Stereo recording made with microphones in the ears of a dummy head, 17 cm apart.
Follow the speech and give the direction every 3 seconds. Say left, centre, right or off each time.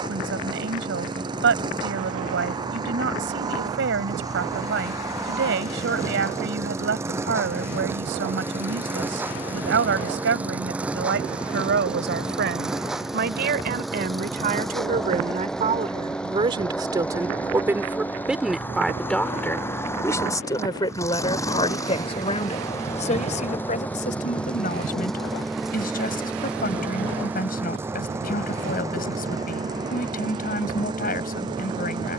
right, right, right, right, right, right, centre, left, left, left, left.